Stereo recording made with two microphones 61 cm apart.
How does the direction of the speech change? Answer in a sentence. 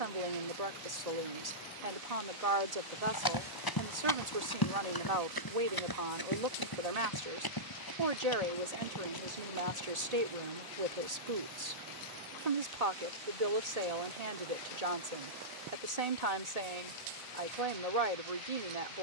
In this clip you hear the speech stay in one place.